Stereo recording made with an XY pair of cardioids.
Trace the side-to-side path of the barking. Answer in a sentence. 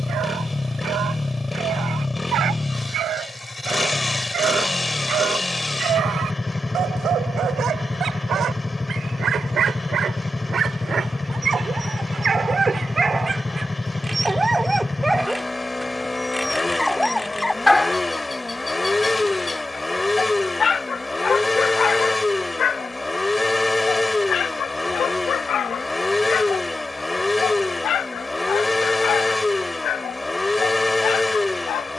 In this clip you hear the barking move to the left.